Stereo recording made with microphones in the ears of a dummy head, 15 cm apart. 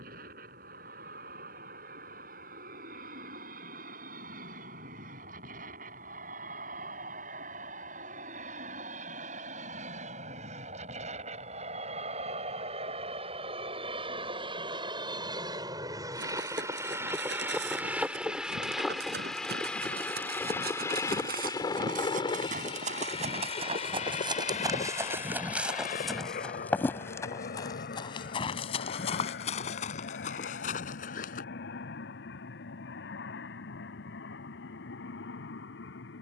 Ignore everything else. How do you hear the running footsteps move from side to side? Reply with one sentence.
You can hear the running footsteps move to the left.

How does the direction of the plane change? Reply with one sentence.
In this clip you hear the plane travel towards the left.